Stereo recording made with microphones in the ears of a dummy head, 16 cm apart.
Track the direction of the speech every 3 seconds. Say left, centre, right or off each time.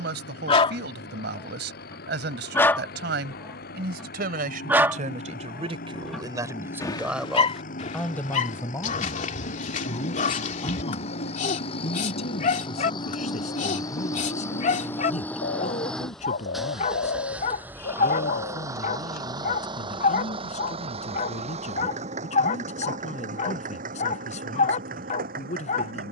right, right, centre, left, left, left, left, left, left.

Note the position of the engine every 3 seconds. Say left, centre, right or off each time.
left, left, left, left, left, centre, right, right, right.